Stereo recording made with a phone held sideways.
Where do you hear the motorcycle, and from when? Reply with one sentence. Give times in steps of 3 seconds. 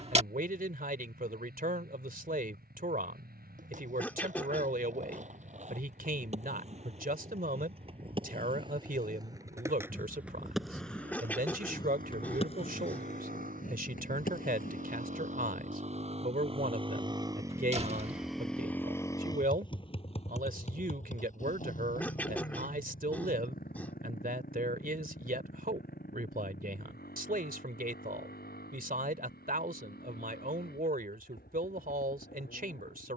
In this clip you hear the motorcycle on the right from 0 s and on the left from 18 s.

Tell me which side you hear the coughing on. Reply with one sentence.
You can hear the coughing in the centre.